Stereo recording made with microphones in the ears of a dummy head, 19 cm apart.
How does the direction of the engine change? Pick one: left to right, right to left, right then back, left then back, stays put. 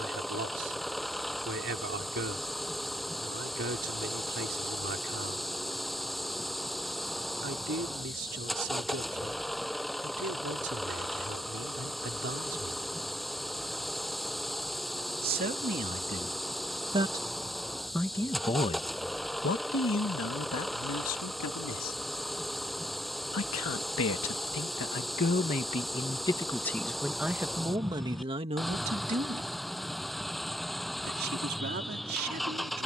stays put.